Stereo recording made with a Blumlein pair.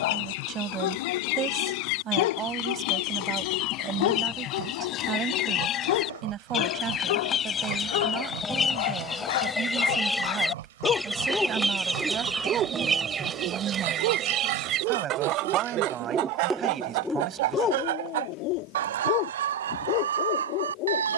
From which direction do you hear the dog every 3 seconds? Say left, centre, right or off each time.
left, left, left, left, right, centre, left.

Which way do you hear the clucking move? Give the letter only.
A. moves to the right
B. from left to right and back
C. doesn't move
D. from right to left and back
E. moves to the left
A.